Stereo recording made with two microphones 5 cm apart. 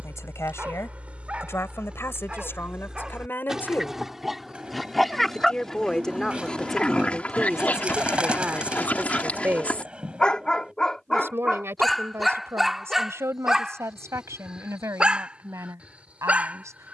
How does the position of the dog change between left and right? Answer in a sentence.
You can hear the dog go left and come back.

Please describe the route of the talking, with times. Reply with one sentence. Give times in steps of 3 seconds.
In this clip you hear the talking on the left from 0 s, in the centre from 6 s and on the right from 9 s.